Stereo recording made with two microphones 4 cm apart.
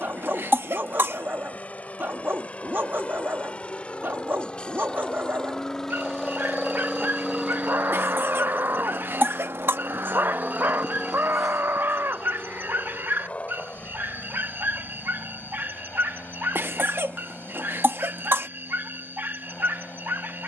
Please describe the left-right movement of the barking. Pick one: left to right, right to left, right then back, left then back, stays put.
stays put.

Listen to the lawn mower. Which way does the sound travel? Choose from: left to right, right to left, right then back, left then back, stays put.
right then back.